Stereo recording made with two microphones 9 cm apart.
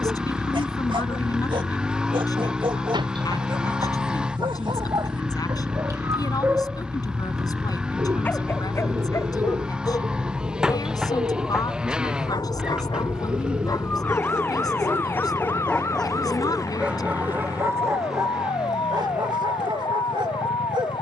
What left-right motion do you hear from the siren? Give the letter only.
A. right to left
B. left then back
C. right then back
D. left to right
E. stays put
A.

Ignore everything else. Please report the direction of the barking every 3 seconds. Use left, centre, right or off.
right, right, centre, left, left, centre, right.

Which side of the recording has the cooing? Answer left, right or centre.
right.